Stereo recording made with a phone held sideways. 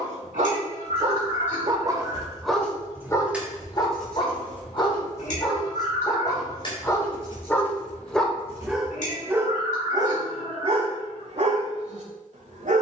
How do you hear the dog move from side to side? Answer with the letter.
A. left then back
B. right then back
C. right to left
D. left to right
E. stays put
A.